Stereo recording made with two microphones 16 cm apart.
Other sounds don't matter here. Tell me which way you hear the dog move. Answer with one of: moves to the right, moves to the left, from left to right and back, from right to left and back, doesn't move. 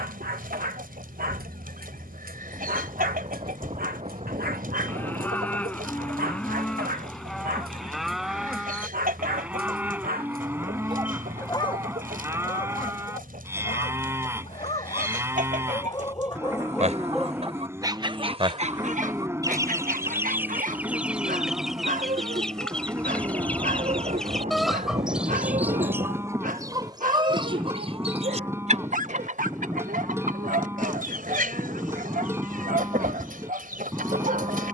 from right to left and back.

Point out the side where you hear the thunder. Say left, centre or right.
right.